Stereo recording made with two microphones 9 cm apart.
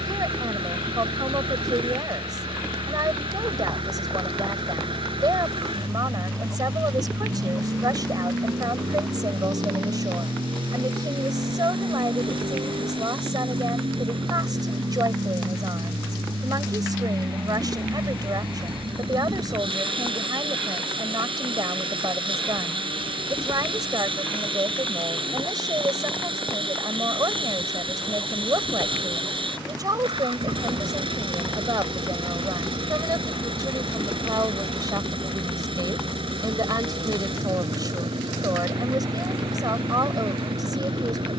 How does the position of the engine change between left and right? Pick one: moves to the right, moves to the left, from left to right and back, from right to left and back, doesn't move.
doesn't move.